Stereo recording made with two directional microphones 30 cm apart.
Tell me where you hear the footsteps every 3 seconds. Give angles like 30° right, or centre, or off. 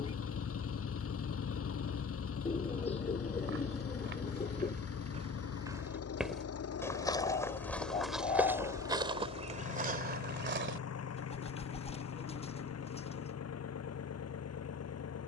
off, 30° right, centre, 30° right, off.